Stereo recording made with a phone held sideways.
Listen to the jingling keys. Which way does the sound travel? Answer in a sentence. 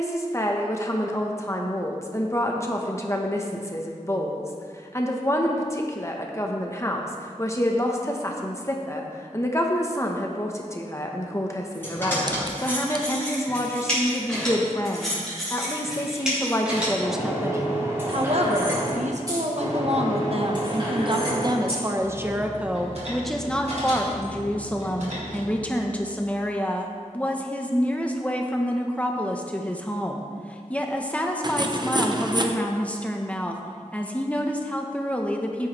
In this clip you hear the jingling keys move to the right.